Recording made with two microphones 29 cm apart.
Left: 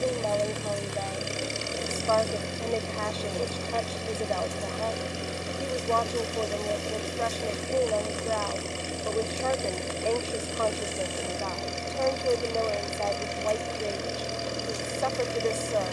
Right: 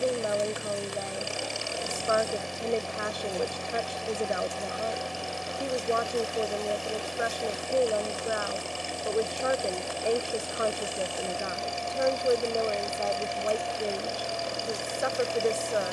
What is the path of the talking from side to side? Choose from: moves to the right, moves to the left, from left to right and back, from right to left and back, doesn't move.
doesn't move.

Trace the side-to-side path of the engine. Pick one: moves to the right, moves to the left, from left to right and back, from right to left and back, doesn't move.
doesn't move.